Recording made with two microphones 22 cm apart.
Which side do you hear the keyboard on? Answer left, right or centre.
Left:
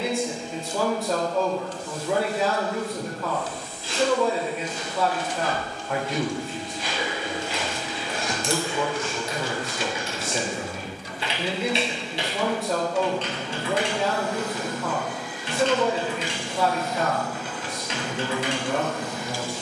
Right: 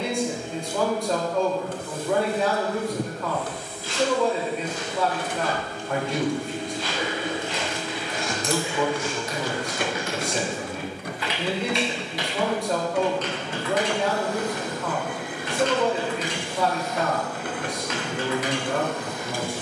left.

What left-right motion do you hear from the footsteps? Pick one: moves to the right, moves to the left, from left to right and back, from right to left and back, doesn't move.
moves to the right.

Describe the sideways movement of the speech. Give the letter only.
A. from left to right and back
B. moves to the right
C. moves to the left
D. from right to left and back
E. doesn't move
E.